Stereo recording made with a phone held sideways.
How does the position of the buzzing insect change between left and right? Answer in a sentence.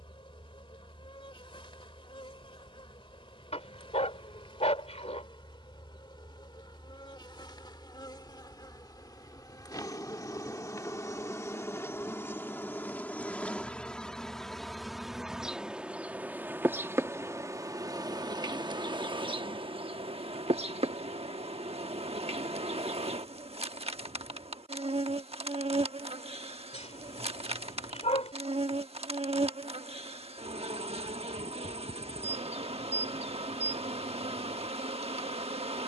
You can hear the buzzing insect move to the right.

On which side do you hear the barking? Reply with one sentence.
You can hear the barking on the left.